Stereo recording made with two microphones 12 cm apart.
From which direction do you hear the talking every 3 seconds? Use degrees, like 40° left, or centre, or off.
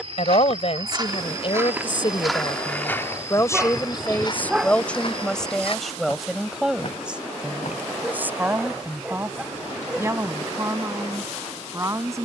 50° left, 10° left, 10° right, 20° right.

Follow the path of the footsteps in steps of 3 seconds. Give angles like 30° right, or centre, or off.
20° right, 40° left, 60° left, off.